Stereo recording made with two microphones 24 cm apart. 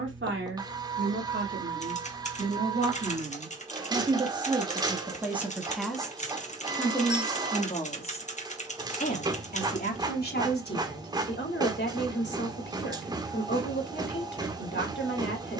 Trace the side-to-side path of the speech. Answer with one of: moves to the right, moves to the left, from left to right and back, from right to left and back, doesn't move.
moves to the left.